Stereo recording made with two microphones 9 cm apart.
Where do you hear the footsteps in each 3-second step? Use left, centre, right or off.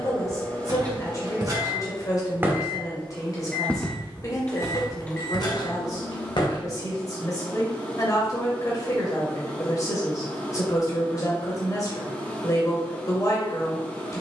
right, left, left, off, off.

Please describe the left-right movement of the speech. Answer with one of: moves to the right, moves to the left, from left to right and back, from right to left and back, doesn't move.
doesn't move.